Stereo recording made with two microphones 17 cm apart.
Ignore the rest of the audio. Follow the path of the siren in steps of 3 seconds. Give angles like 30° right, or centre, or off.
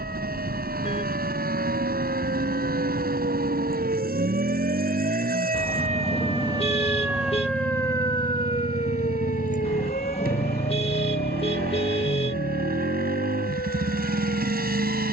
70° right, 60° right, centre, 60° left, 70° left.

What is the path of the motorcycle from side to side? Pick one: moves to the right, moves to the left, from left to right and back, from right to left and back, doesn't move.
doesn't move.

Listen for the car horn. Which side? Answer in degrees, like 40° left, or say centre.
40° left.